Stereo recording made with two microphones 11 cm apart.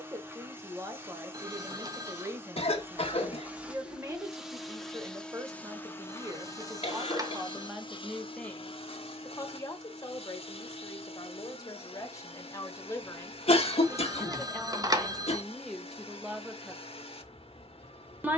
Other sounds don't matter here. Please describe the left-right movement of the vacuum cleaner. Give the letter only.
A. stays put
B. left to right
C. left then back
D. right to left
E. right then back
D.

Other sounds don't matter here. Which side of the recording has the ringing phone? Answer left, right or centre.
right.